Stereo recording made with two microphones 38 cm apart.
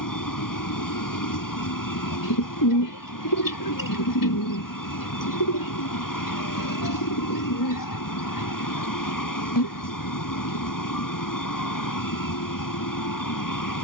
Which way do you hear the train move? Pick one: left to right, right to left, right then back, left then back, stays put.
stays put.